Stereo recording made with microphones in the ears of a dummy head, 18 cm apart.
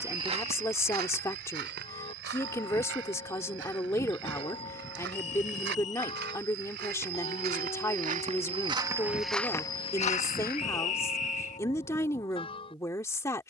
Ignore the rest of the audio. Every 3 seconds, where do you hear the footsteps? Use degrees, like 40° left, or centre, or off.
50° right, 70° right, 50° right, 20° left, off.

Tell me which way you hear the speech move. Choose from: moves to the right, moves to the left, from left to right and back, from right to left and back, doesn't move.
doesn't move.